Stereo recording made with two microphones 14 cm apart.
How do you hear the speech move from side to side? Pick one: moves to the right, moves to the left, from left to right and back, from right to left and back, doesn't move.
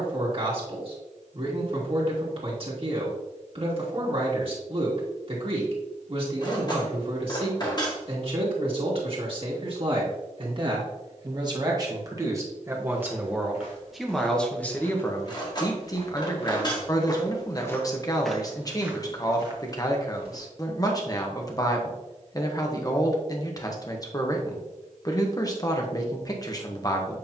moves to the left.